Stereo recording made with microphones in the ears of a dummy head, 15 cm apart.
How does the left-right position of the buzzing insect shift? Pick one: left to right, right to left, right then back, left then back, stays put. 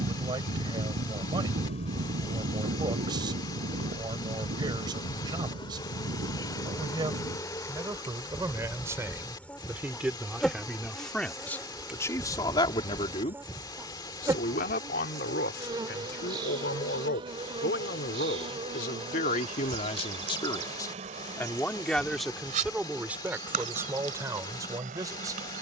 left to right.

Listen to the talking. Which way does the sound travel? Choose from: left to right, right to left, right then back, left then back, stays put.
left then back.